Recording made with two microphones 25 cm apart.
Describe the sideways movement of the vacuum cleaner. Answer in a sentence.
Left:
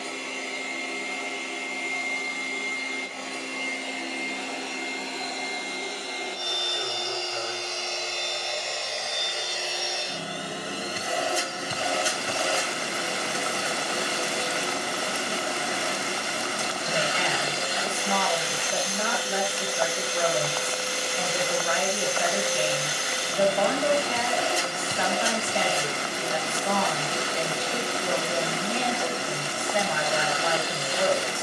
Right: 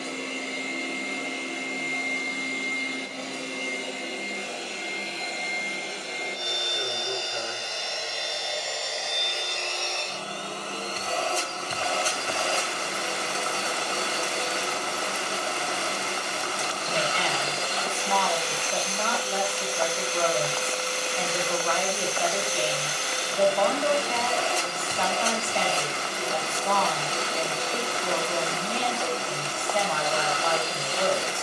You can hear the vacuum cleaner go from the right side to the left.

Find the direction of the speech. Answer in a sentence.
In this clip you hear the speech in the centre.